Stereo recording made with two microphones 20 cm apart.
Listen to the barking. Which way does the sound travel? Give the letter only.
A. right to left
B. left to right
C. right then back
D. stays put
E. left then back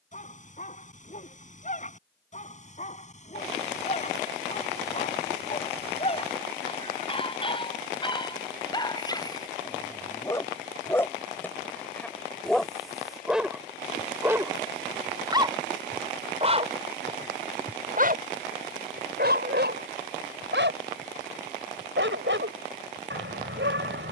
B.